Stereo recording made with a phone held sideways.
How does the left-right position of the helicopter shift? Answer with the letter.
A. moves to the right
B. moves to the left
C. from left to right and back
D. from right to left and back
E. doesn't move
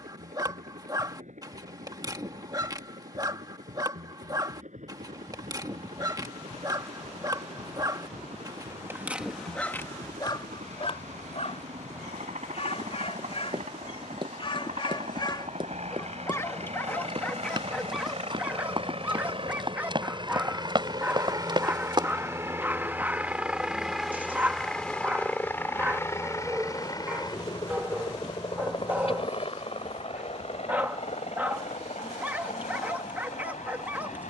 B.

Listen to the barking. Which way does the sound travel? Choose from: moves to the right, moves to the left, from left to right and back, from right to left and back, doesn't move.
from right to left and back.